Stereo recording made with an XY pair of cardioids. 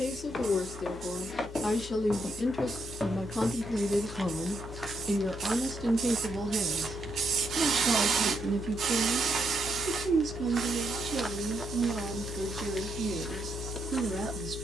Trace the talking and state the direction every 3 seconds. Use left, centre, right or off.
left, centre, right, right, right.